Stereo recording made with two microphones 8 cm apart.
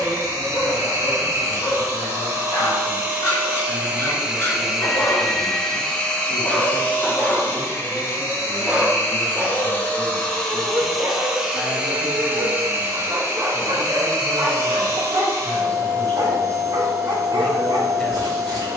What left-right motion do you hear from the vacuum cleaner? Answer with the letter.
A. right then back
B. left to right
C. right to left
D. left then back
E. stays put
D.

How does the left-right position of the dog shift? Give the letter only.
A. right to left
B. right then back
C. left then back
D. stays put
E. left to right
E.